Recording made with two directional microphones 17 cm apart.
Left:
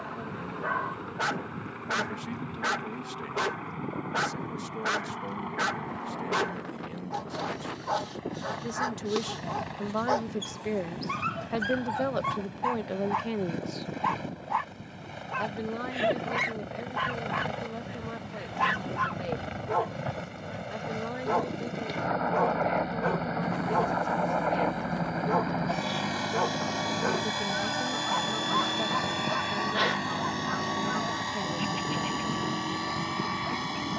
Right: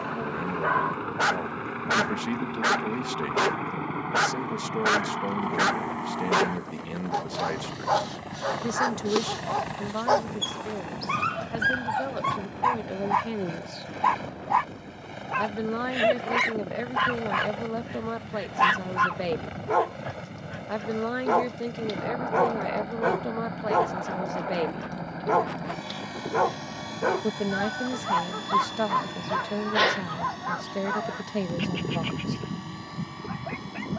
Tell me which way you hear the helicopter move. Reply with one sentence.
In this clip you hear the helicopter travel towards the left.